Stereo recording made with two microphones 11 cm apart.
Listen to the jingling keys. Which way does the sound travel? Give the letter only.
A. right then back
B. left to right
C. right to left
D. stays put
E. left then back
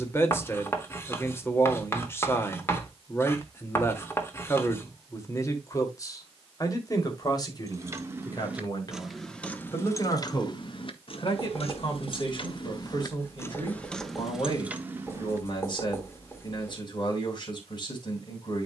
E.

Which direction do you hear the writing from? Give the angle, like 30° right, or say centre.
20° left.